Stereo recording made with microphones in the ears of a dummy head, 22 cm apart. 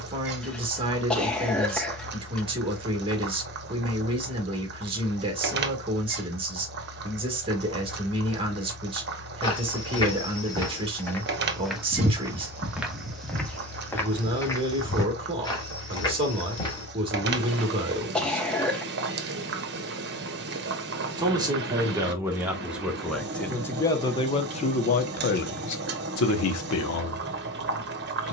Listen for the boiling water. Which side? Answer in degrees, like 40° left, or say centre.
40° right.